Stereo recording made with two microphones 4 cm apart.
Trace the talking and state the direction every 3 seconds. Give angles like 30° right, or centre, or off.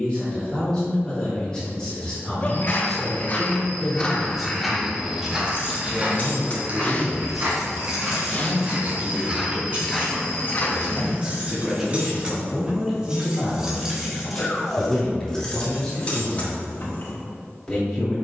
20° left, centre, 30° right, 20° right, centre, 10° left.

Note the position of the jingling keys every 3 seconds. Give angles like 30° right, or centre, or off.
off, 60° left, 10° left, 30° right, 10° right, 30° left.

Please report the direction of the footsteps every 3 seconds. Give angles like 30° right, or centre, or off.
50° left, centre, 40° right, 10° left, off, off.